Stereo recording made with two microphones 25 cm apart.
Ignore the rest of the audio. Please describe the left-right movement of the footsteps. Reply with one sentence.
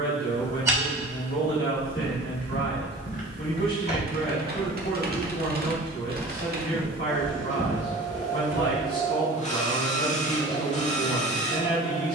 You can hear the footsteps go left and come back.